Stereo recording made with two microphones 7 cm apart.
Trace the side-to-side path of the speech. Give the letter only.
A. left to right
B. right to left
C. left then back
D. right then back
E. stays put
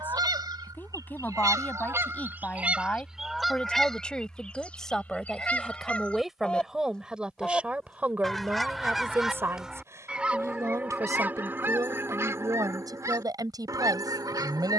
A.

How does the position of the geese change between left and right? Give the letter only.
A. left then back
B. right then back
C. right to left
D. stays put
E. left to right
A.